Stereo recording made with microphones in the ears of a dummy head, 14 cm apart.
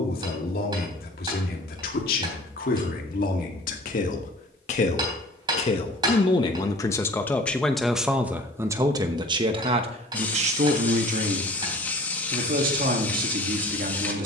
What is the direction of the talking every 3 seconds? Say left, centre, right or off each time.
left, left, centre, right, right.